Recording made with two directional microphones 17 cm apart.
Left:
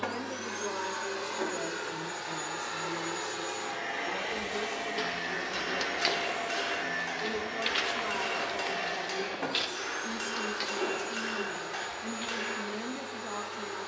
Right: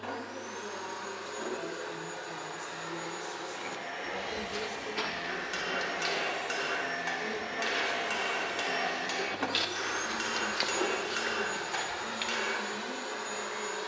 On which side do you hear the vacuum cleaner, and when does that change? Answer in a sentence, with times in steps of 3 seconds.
You can hear the vacuum cleaner on the left from 0 s, in the centre from 6 s and on the right from 9 s.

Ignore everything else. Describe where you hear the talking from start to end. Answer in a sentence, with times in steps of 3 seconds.
In this clip you hear the talking on the left from 0 s, in the centre from 3 s and on the left from 6 s.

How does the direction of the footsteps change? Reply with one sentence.
You can hear the footsteps go left and come back.